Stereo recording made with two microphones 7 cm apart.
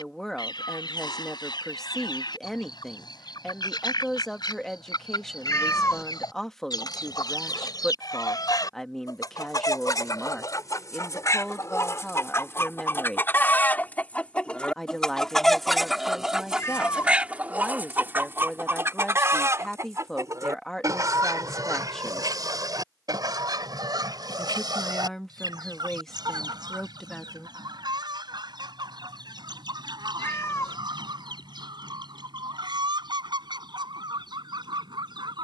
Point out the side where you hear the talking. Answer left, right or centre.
centre.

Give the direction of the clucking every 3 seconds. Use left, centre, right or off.
left, left, left, left, left, centre, right, right, right, right, right, right.